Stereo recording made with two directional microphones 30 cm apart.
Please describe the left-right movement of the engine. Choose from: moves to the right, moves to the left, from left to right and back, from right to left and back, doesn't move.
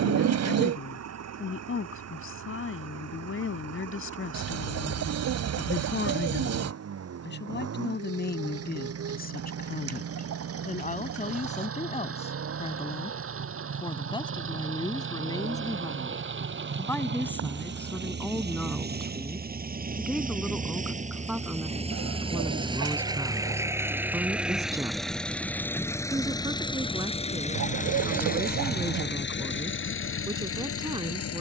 moves to the left.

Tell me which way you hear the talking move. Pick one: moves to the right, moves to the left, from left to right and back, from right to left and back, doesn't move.
moves to the right.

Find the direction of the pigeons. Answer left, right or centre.
right.